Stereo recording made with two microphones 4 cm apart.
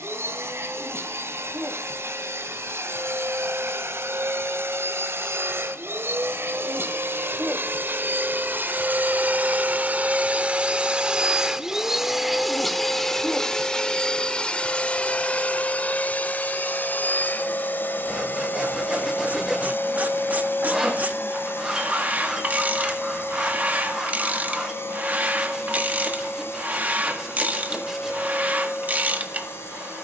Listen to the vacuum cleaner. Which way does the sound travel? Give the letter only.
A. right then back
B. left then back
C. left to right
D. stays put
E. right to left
E.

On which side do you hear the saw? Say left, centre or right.
centre.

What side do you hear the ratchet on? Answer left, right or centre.
right.